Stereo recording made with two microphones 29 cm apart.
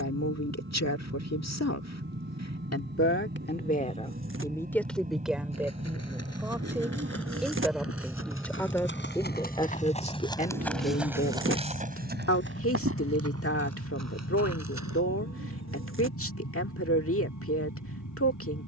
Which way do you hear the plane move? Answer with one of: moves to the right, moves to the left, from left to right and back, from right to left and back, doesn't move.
moves to the left.